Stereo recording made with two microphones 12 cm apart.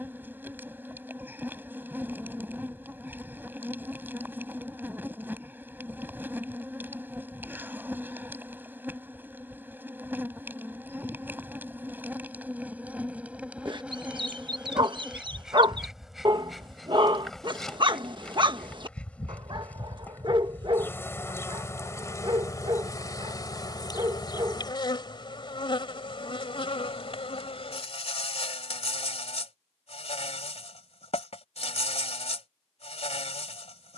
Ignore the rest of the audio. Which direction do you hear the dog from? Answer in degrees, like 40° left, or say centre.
40° right.